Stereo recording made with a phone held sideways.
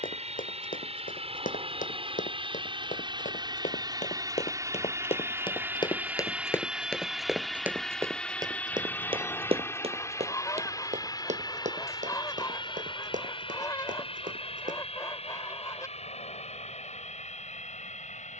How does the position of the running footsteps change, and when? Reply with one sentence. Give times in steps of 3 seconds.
You can hear the running footsteps on the left from 0 s, in the centre from 6 s, on the right from 9 s and not at all from 15 s.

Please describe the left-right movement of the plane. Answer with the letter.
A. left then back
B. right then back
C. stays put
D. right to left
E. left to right
D.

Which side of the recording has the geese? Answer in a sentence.
In this clip you hear the geese on the left.